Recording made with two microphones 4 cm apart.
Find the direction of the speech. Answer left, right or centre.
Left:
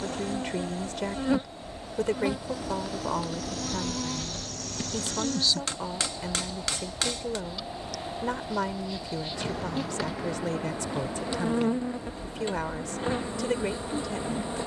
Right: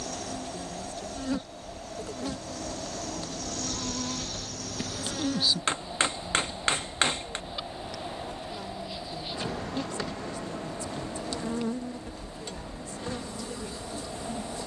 left.